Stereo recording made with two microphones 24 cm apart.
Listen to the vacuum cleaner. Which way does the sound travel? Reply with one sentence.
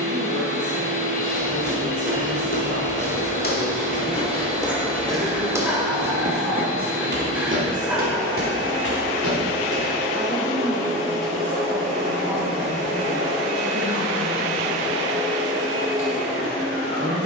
You can hear the vacuum cleaner stay in one place.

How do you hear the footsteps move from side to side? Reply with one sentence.
In this clip you hear the footsteps go from the left side to the right.